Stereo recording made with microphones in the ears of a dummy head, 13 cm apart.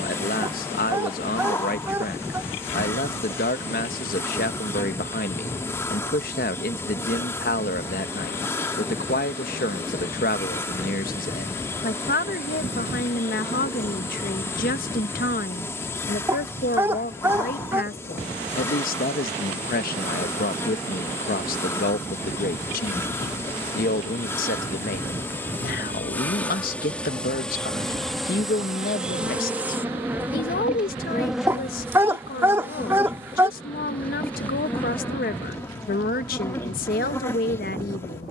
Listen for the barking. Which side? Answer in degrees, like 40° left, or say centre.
20° right.